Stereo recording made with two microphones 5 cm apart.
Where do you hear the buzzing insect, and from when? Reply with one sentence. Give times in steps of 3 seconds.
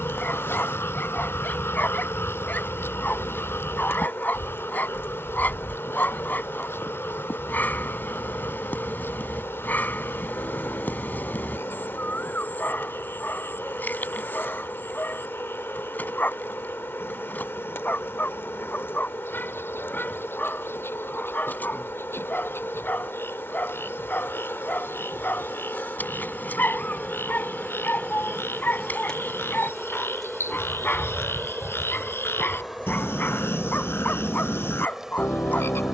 In this clip you hear the buzzing insect on the left from 0 s and in the centre from 30 s.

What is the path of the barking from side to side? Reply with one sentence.
In this clip you hear the barking stay in one place.